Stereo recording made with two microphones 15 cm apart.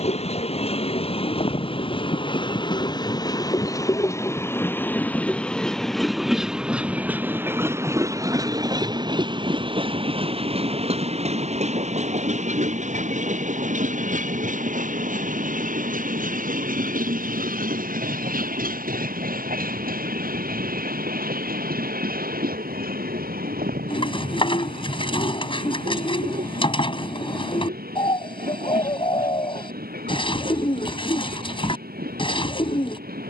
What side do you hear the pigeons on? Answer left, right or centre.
left.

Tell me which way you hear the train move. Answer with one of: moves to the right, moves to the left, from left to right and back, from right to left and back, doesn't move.
moves to the right.